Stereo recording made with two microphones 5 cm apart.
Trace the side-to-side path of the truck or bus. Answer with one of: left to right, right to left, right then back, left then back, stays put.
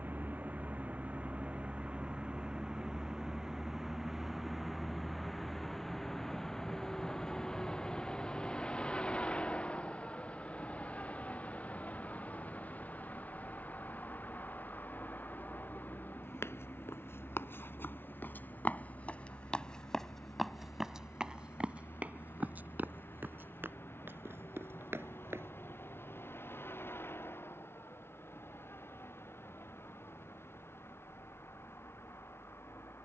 right to left.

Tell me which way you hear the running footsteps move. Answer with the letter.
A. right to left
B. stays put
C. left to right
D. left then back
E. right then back
C.